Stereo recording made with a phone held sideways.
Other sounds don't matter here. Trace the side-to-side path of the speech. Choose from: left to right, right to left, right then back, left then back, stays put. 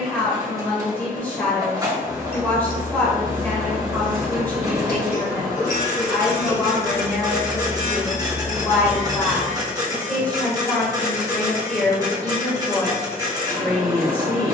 stays put.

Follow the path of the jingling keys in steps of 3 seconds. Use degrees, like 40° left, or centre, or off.
20° left, 60° left, 40° left, centre, off.